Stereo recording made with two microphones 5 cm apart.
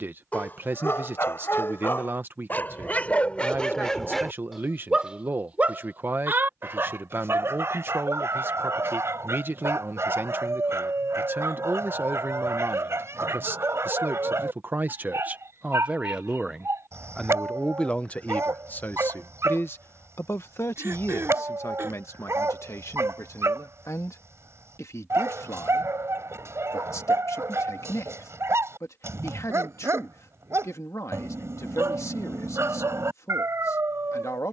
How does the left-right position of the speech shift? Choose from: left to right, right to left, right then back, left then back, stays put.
right to left.